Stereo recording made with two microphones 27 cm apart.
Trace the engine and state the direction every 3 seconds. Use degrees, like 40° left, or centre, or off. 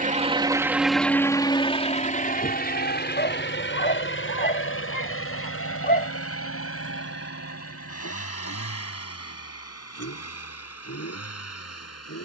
10° left, 50° left, 60° left, 60° left.